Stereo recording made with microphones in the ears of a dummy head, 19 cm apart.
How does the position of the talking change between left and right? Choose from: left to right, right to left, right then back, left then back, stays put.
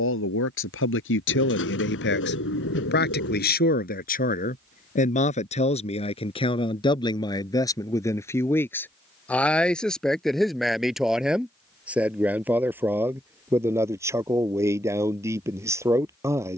left to right.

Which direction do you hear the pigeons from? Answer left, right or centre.
left.